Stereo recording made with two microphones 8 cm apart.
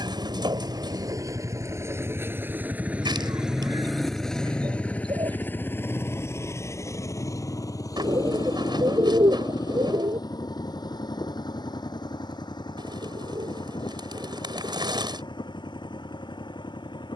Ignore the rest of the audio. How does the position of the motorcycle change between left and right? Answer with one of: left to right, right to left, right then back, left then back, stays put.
right to left.